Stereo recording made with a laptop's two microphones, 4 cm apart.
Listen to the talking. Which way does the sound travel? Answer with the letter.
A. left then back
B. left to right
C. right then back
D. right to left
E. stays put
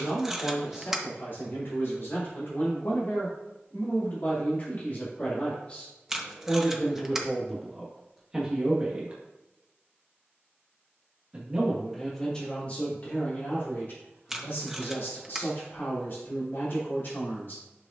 C.